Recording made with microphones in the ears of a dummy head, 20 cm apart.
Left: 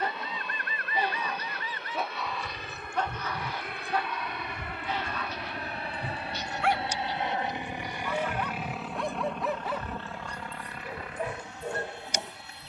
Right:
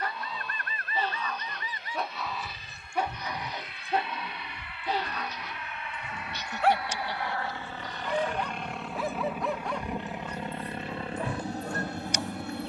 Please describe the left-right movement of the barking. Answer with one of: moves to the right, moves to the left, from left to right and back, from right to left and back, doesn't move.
from left to right and back.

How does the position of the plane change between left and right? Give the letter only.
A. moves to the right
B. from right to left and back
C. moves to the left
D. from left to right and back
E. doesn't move
A.